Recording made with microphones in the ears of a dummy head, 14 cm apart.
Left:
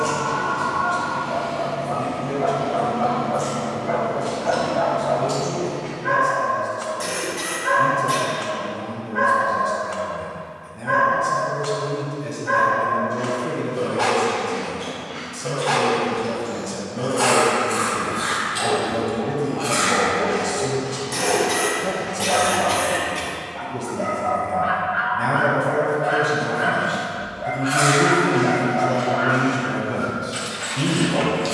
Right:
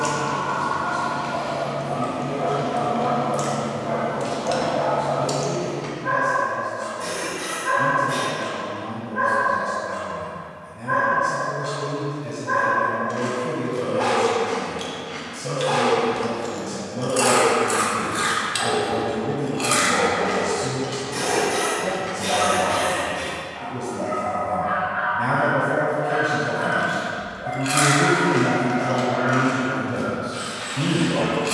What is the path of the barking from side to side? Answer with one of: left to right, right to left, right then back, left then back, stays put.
stays put.